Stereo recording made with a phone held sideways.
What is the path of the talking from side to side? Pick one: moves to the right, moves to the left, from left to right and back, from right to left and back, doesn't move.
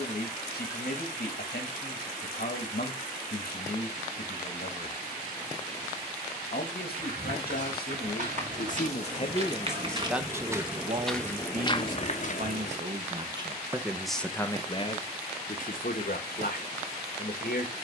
from left to right and back.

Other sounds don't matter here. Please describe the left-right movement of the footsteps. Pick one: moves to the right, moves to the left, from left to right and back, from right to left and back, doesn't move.
moves to the left.